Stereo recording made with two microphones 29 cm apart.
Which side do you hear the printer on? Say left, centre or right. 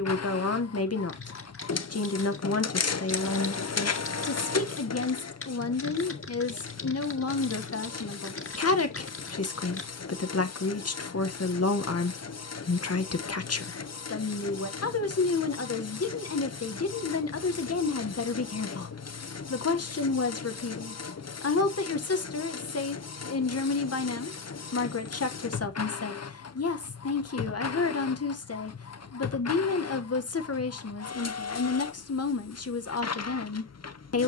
left.